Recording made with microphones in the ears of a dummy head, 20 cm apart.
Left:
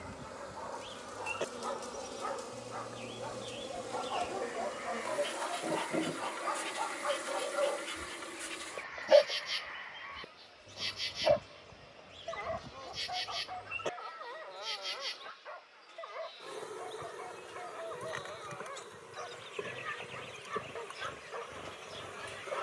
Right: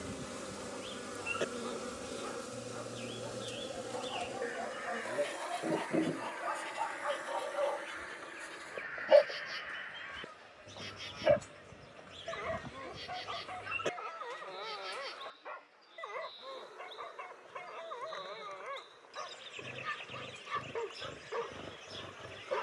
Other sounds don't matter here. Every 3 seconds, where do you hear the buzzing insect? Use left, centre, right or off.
right, centre, left, left, left, left, left, left.